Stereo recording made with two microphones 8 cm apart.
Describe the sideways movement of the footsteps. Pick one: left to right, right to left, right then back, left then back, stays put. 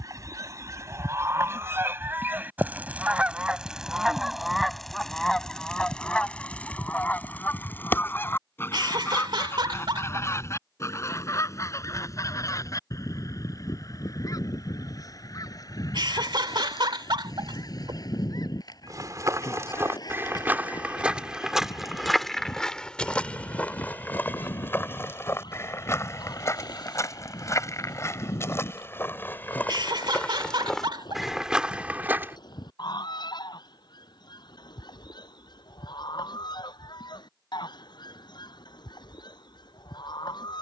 left then back.